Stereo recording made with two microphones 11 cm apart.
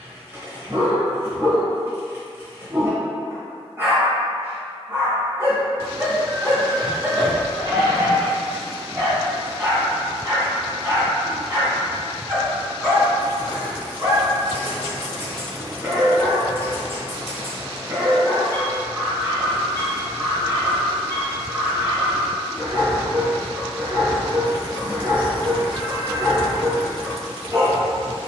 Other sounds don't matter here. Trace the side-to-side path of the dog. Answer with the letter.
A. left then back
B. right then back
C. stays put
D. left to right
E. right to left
C.